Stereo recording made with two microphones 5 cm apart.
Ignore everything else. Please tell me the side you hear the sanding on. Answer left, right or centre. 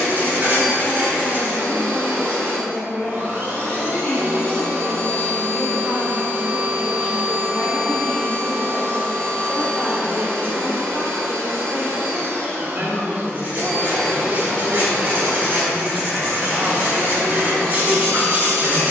right.